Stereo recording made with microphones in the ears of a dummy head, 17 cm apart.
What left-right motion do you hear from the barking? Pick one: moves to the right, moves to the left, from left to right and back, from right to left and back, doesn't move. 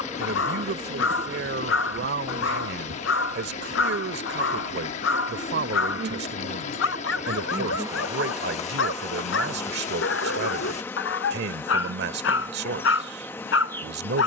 doesn't move.